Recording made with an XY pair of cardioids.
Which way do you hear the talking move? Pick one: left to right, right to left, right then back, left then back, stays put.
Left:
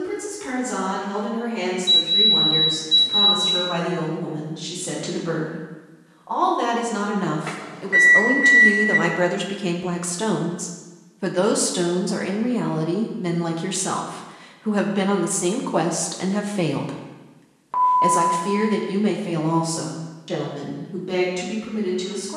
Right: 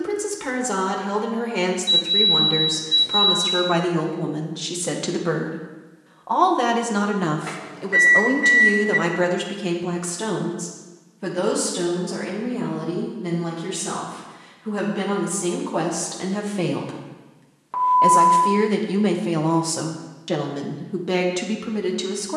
left then back.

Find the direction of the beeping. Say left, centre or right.
centre.